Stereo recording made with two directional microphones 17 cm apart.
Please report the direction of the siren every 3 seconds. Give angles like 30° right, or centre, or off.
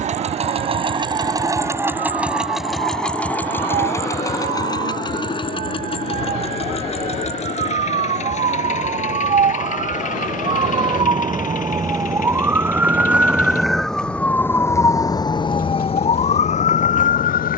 60° right, 50° right, 50° right, 30° right, centre, 40° left.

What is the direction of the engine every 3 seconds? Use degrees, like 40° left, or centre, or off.
20° right, 20° left, 40° left, 50° left, 50° left, 60° left.